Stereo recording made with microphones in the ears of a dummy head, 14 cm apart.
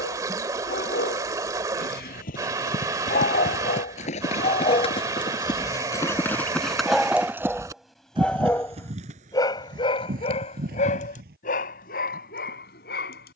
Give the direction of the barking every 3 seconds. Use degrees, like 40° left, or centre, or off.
80° left, 40° left, centre, 50° left, 70° left.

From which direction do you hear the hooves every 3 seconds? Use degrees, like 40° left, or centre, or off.
60° left, 40° left, 10° right, 60° right, off.